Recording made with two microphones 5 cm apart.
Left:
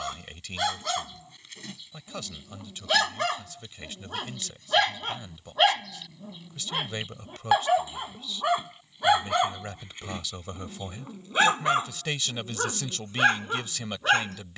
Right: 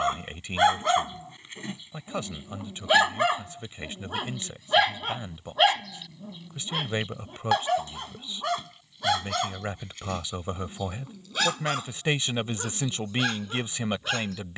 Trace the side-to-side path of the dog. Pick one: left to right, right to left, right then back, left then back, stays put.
right to left.